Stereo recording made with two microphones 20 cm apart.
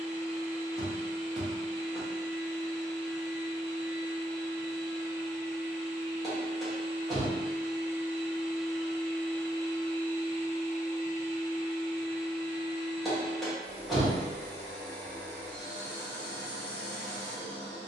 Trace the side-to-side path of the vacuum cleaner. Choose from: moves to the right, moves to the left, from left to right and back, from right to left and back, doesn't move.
moves to the left.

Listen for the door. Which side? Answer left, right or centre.
centre.